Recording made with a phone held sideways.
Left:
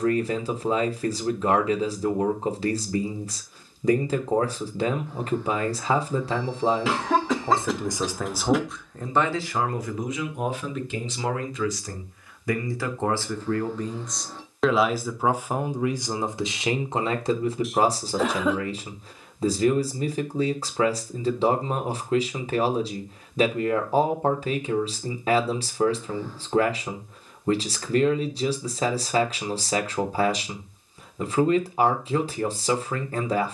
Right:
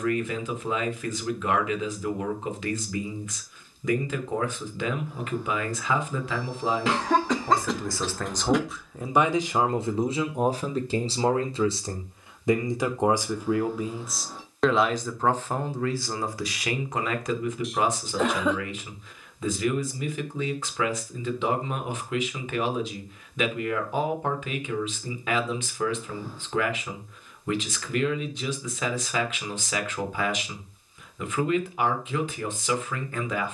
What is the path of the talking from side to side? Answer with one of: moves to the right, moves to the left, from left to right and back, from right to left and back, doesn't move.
from left to right and back.